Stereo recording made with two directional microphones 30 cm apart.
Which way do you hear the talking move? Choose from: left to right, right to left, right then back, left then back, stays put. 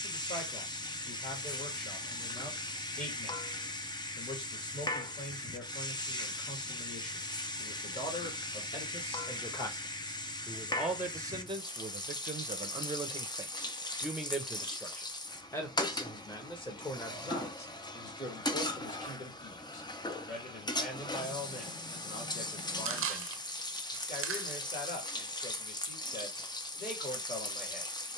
right then back.